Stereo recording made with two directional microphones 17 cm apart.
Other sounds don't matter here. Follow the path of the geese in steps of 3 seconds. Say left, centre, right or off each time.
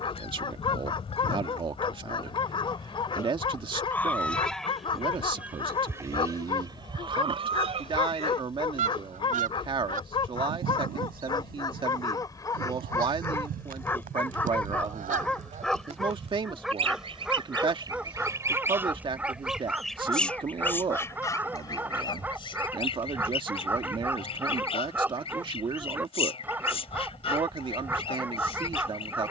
left, centre, right, right, right, right, centre, left, left, left.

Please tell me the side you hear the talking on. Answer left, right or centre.
right.